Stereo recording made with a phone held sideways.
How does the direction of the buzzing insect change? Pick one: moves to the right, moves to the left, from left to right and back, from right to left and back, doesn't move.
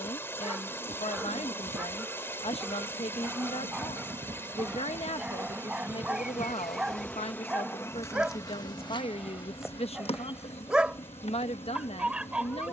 moves to the left.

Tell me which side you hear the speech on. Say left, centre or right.
left.